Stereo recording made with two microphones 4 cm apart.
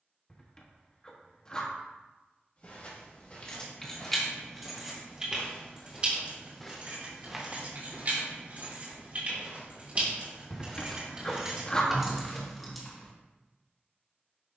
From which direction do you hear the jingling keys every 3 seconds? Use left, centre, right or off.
off, centre, right, right, centre.